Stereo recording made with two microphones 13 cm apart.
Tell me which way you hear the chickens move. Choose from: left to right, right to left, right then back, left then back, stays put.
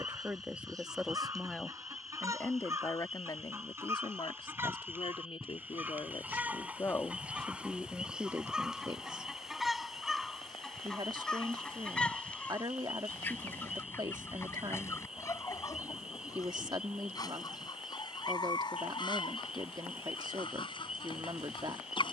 right to left.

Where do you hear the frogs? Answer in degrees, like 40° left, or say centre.
10° right.